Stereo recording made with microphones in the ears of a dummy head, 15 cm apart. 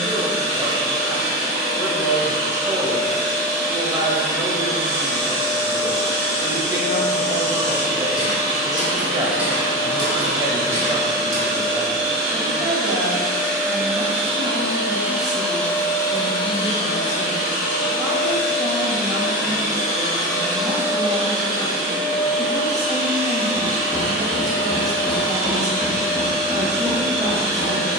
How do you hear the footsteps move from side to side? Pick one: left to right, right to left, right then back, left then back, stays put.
left then back.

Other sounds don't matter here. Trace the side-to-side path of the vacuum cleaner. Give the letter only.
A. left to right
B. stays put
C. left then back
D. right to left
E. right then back
C.